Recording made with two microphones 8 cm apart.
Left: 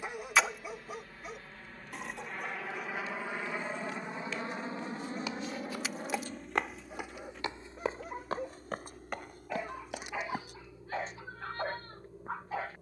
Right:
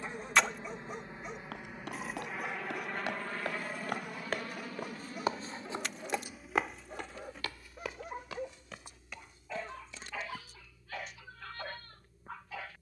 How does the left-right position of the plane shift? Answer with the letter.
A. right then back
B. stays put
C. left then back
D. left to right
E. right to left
E.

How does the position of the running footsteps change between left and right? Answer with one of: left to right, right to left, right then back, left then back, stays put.
right to left.